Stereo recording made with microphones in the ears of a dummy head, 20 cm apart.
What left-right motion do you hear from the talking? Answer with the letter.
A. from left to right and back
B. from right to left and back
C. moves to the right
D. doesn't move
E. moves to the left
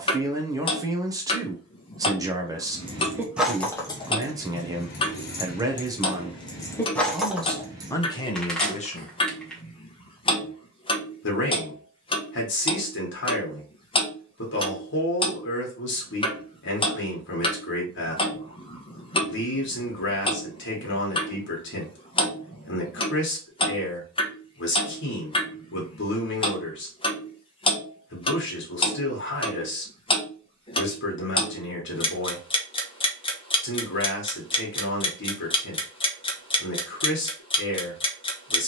E.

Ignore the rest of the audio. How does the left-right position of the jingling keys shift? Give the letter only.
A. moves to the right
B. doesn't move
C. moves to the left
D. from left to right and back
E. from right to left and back
E.